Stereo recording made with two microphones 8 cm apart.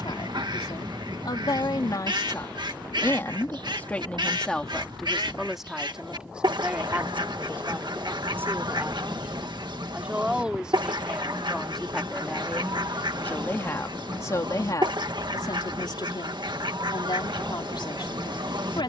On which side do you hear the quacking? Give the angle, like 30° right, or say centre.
70° right.